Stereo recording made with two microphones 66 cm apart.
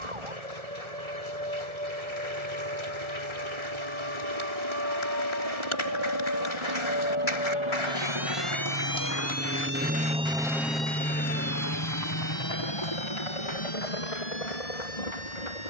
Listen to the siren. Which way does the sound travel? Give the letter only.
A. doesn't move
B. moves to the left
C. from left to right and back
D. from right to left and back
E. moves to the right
B.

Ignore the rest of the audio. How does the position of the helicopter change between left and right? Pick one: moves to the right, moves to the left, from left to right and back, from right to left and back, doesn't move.
moves to the left.